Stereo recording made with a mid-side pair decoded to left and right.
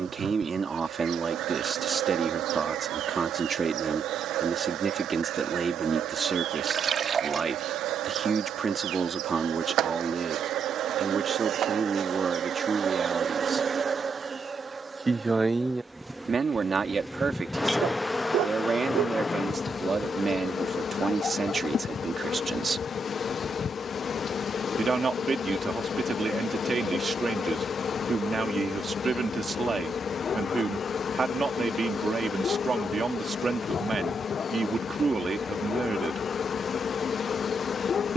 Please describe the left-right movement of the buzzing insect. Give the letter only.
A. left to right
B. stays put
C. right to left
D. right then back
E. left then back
C.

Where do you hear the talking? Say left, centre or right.
right.